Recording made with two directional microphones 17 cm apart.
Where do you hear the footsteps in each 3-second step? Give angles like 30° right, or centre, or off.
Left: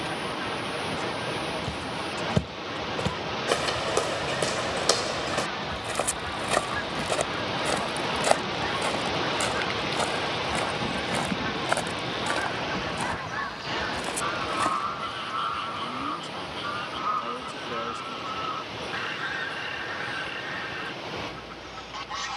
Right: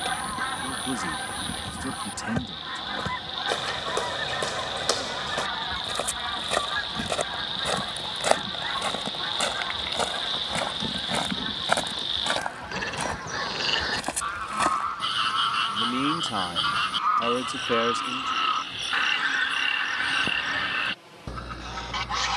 30° left, 20° left, centre, 10° right, 20° right, off, off, off.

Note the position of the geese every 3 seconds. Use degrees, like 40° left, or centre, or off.
40° right, 40° right, 20° right, 10° left, centre, 30° right, 40° right, 40° right.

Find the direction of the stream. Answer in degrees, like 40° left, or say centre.
70° left.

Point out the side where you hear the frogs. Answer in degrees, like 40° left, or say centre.
70° right.